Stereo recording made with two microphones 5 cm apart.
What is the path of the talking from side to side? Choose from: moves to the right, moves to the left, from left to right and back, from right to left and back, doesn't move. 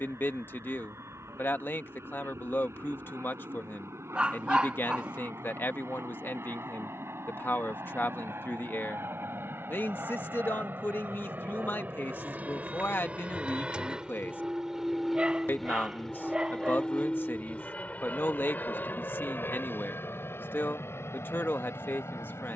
doesn't move.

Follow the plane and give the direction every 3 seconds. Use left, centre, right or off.
right, right, right, right, right, centre, left, left.